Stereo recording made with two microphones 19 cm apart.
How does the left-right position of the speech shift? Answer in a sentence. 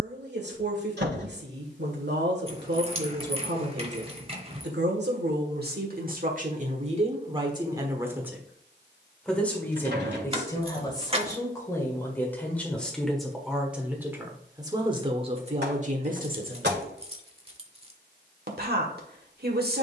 You can hear the speech go left and come back.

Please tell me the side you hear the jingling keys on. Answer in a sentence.
In this clip you hear the jingling keys on the right.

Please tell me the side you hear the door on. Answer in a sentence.
In this clip you hear the door on the right.